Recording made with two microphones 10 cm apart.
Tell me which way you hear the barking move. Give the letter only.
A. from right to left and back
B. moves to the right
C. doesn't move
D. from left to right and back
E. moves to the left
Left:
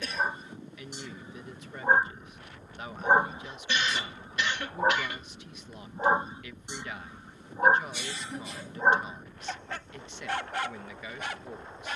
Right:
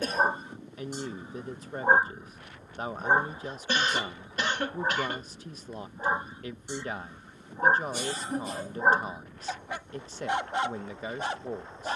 A.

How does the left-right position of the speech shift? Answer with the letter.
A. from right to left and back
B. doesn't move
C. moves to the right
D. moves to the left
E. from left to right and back
B.